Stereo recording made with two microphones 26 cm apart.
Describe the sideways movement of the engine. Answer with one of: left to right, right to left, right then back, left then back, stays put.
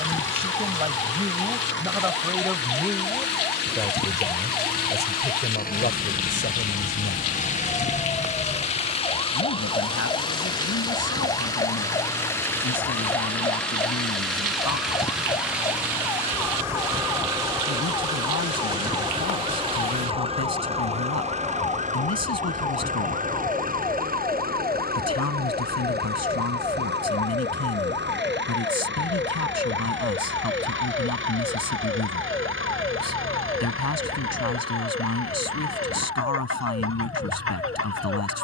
left to right.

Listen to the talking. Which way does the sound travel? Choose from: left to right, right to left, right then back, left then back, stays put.
right to left.